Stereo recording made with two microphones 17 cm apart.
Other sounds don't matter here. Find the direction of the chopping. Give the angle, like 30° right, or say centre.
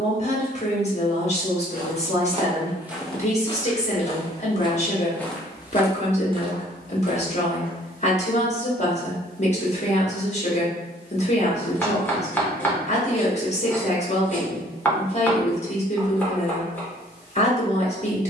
10° left.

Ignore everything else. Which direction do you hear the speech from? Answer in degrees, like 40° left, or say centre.
40° left.